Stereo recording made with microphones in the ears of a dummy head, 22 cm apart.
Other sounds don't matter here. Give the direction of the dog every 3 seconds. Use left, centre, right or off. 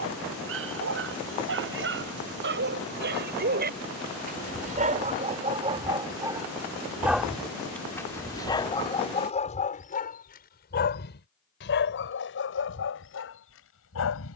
right, right, centre, left, left.